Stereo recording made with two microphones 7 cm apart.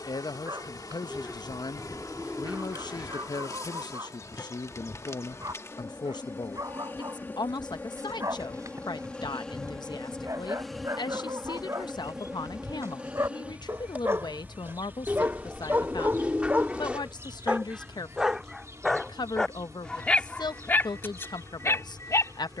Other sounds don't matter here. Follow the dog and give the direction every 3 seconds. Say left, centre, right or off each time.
right, right, right, right, right, right, centre, left.